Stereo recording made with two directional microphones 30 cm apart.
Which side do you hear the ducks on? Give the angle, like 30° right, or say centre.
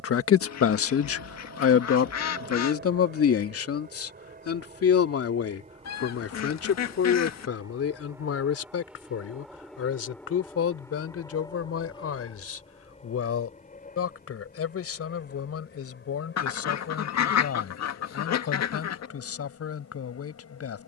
60° left.